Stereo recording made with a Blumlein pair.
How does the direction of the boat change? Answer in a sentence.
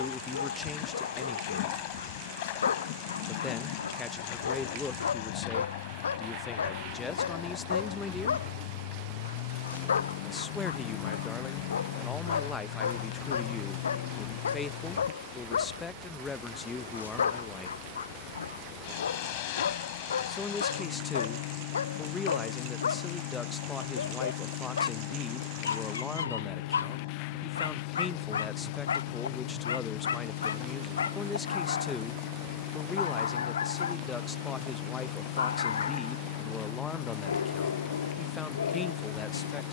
You can hear the boat stay in one place.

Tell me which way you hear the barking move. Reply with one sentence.
In this clip you hear the barking stay in one place.